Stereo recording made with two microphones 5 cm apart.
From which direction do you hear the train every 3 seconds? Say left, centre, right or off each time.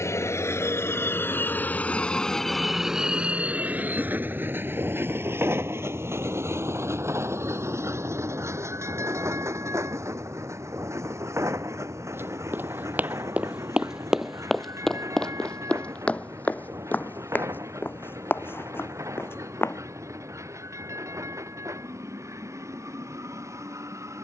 left, right, right, right, right, right, right, right.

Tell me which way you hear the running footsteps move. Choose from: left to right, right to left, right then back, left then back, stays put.
right to left.